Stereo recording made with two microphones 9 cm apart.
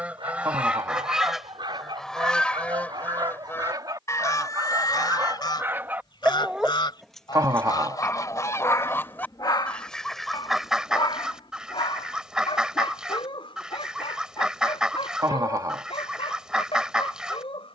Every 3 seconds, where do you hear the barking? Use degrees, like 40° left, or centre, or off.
60° right, 40° right, 10° left, 60° left, 70° left, 80° left.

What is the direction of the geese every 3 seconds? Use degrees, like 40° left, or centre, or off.
centre, 40° left, 40° left, centre, 10° right, 10° right.